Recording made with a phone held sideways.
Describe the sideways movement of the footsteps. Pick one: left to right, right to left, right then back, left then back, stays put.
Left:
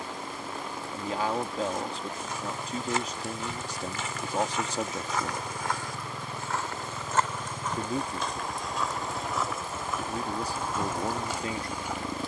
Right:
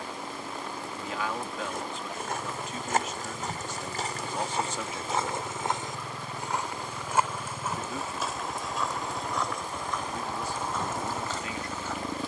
right to left.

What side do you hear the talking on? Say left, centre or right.
left.